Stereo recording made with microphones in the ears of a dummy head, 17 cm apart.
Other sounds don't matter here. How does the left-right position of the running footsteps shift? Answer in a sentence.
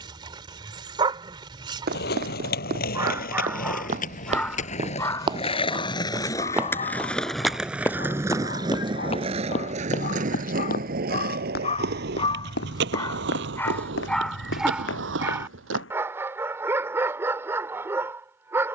You can hear the running footsteps move to the left.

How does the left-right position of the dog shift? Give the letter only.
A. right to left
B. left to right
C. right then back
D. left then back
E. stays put
D.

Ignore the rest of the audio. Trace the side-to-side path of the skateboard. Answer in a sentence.
In this clip you hear the skateboard travel towards the right.